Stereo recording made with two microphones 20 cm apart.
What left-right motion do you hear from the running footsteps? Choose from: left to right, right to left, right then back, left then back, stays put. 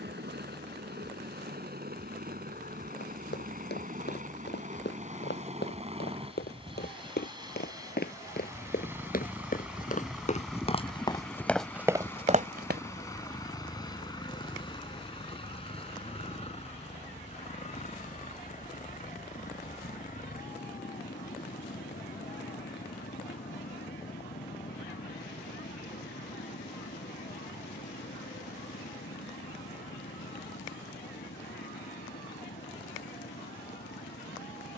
left to right.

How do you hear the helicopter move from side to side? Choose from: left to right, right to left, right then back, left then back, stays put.
right to left.